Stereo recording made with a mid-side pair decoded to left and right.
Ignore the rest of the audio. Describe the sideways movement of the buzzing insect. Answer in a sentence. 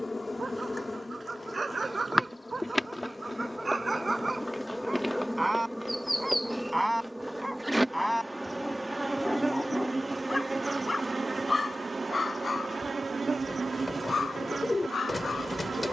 You can hear the buzzing insect travel towards the right.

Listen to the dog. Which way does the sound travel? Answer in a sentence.
You can hear the dog move from right to left.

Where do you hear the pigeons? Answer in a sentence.
In this clip you hear the pigeons on the left.